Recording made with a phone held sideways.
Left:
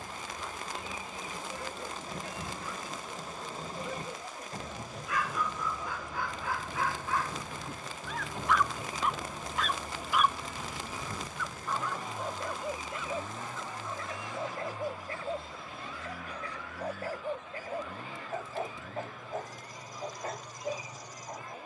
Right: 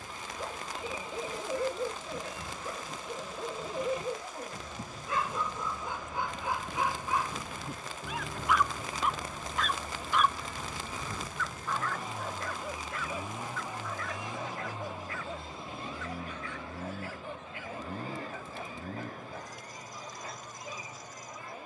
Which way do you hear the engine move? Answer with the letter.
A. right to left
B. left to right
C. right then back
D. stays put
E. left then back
B.